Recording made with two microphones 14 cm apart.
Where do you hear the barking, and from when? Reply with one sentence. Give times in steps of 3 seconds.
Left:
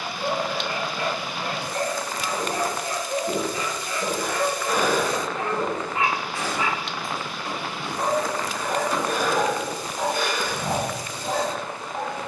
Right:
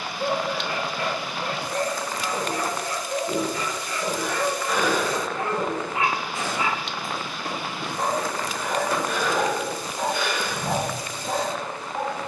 In this clip you hear the barking on the left from 0 s, in the centre from 3 s and on the left from 9 s.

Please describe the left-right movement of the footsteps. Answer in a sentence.
In this clip you hear the footsteps move from left to right and back again.